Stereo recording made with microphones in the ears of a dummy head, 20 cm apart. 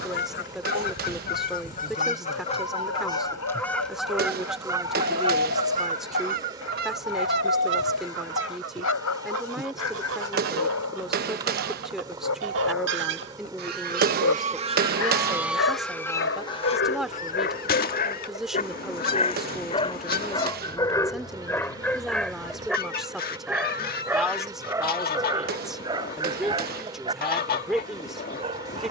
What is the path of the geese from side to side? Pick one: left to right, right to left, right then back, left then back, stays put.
right then back.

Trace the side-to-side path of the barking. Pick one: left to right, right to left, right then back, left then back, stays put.
left to right.